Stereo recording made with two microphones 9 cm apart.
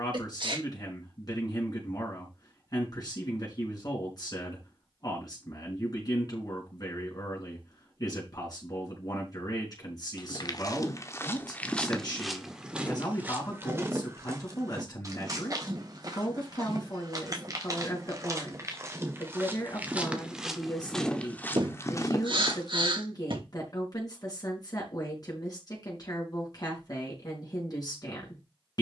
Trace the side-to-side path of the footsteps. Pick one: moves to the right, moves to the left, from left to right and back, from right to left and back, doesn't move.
from left to right and back.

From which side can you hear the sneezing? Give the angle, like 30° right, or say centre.
60° right.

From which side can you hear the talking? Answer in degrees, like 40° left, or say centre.
40° left.